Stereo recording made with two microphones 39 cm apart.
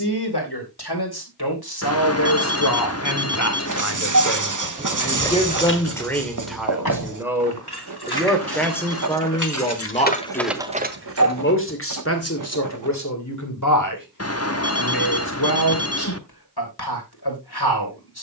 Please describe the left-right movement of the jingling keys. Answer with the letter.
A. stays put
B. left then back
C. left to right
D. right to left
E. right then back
B.